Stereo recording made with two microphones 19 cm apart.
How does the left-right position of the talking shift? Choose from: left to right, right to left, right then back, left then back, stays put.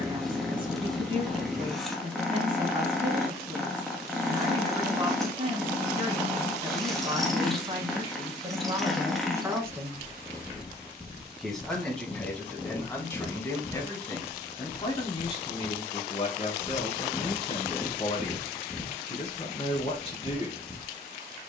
right to left.